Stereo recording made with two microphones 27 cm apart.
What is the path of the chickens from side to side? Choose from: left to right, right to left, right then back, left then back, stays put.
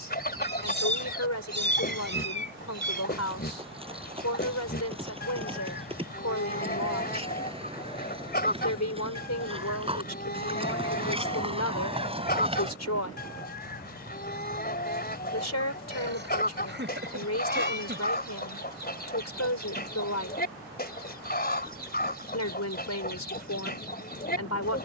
stays put.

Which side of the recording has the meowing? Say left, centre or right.
right.